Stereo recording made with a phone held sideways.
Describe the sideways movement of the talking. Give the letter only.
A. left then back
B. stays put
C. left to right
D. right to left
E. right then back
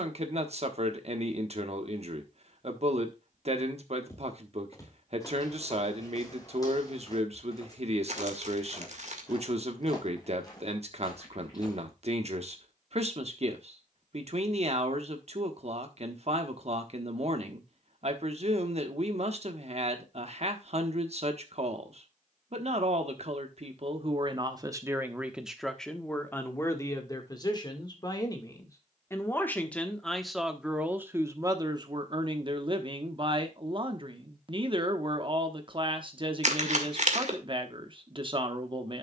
A.